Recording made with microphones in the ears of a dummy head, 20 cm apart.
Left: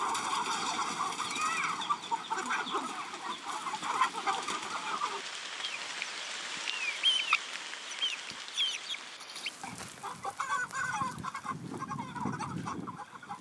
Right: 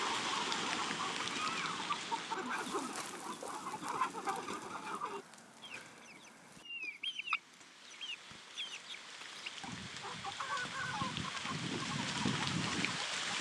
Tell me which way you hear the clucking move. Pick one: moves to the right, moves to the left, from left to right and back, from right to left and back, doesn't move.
doesn't move.